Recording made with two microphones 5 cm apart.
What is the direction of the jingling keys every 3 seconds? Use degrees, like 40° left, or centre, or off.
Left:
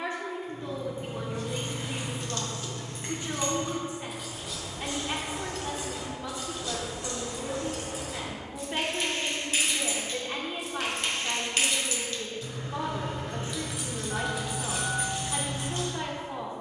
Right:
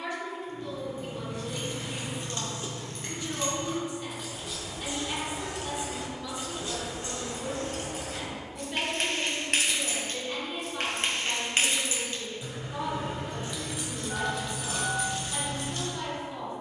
20° left, centre, 40° right, 50° right, centre, 20° left.